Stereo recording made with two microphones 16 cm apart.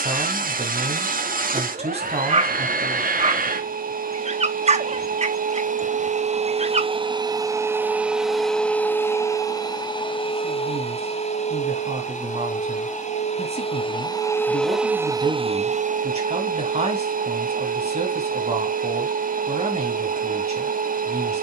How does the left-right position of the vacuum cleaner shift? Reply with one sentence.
You can hear the vacuum cleaner go left and come back.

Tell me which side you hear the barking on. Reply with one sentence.
In this clip you hear the barking on the right.